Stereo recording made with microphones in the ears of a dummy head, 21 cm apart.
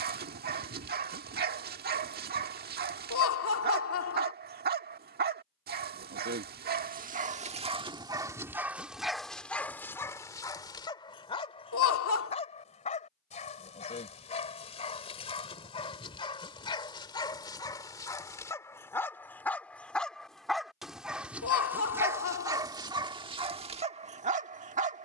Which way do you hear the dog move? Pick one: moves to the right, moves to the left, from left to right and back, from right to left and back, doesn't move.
from right to left and back.